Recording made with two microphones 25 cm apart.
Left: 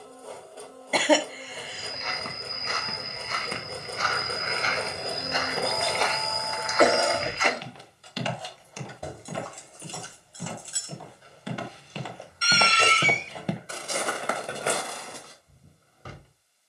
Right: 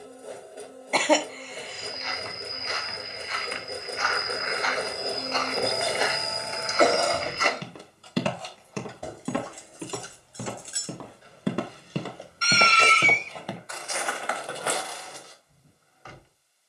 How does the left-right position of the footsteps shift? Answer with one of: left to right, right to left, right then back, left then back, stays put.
right then back.